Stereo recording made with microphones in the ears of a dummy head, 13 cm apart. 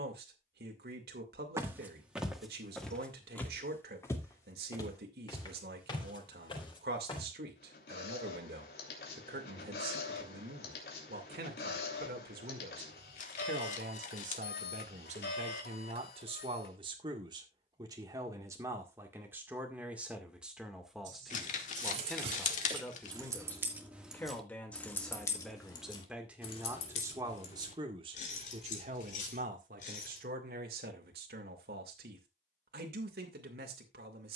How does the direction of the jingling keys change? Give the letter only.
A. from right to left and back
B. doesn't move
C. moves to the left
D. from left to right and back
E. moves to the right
C.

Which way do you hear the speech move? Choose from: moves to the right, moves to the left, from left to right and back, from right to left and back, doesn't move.
from right to left and back.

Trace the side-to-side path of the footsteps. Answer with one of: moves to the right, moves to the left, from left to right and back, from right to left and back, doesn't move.
moves to the left.